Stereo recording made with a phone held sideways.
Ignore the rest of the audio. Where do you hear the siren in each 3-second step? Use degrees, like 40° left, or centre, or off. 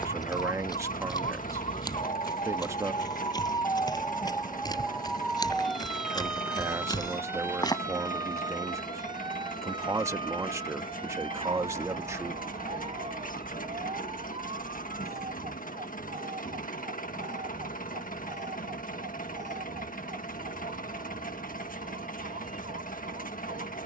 50° left, 10° left, 20° right, 40° right, 50° right, 50° right, 60° right, 60° right.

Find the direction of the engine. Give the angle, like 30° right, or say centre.
80° left.